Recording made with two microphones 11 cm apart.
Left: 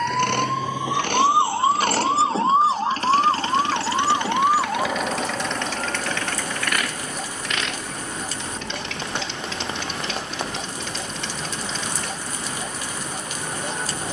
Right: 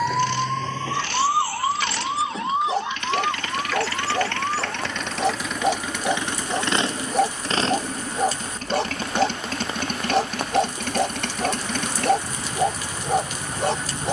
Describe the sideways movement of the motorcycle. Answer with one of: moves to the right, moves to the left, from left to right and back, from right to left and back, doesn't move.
moves to the right.